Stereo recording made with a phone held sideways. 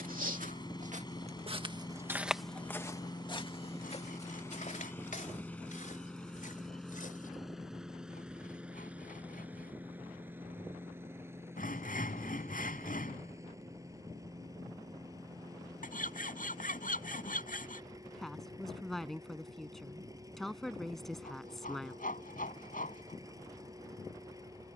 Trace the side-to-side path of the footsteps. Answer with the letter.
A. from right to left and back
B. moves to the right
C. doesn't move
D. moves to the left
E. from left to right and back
D.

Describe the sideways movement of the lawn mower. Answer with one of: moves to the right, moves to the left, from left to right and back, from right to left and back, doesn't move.
moves to the right.